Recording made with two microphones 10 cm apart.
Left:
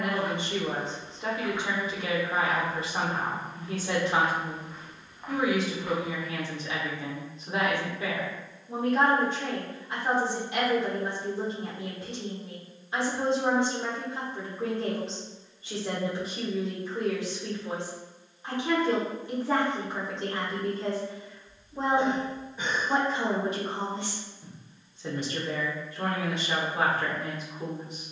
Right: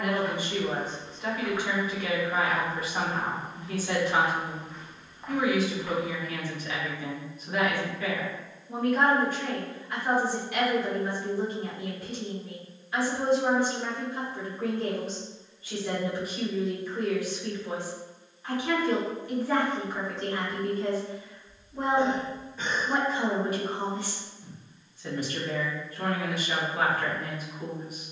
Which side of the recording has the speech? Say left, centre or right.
left.